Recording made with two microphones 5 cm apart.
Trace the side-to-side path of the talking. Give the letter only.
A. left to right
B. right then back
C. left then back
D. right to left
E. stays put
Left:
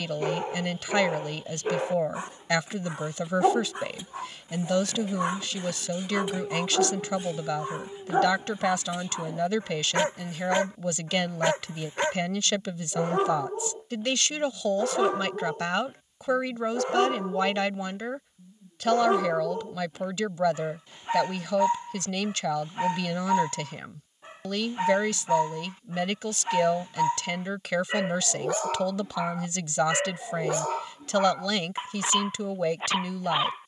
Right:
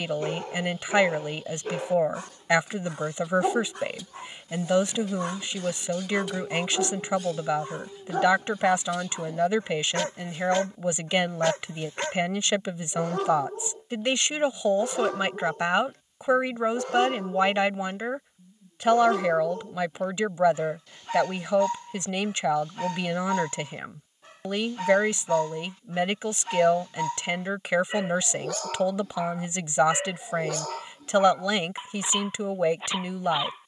E.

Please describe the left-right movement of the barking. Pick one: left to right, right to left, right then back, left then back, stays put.
stays put.